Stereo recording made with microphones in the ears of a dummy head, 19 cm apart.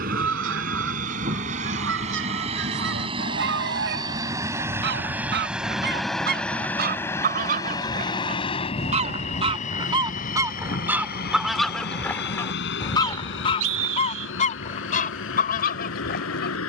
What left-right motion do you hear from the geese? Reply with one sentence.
You can hear the geese move from right to left.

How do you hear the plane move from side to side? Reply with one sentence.
In this clip you hear the plane move from right to left.